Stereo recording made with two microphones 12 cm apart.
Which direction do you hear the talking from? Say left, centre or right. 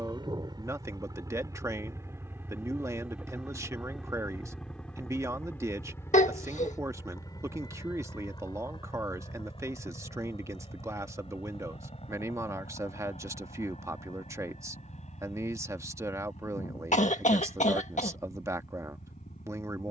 right.